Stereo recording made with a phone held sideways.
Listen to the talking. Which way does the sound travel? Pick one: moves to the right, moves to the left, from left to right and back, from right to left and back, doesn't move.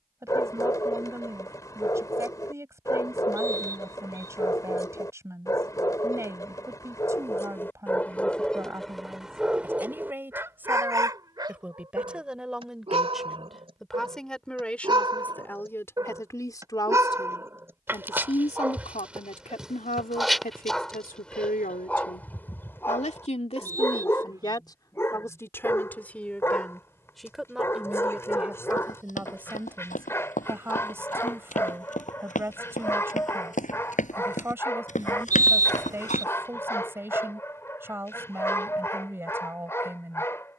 from right to left and back.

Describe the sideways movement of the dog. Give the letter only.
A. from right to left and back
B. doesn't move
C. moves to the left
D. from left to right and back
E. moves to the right
D.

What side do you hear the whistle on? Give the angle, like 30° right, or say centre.
20° right.